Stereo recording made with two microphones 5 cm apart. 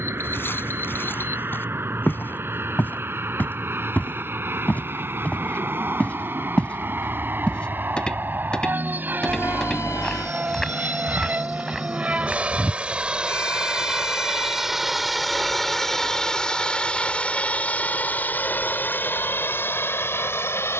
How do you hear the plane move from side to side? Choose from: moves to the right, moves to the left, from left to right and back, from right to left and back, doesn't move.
moves to the left.